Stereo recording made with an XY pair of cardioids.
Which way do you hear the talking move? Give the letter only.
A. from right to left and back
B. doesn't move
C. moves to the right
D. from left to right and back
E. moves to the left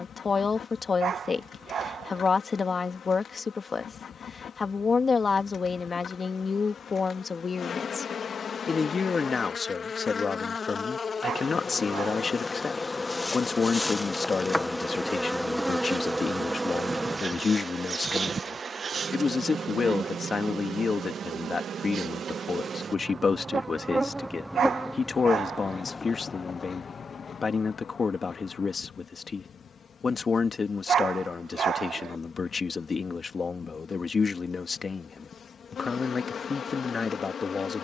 B.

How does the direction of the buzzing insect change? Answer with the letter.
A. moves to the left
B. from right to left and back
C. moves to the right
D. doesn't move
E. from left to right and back
E.